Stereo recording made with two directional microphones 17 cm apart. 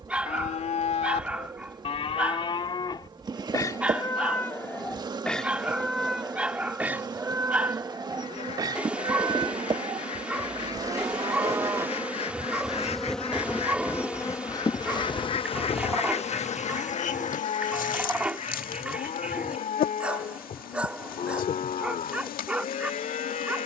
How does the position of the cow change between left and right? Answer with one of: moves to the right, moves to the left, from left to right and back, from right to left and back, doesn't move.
from left to right and back.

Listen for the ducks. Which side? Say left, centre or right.
left.